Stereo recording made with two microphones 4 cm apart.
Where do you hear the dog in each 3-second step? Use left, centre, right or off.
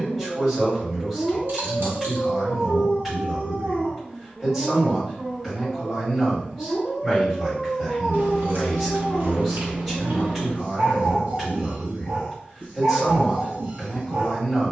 right, right, centre, right, right.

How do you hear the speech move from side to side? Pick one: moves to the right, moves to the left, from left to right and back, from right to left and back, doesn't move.
doesn't move.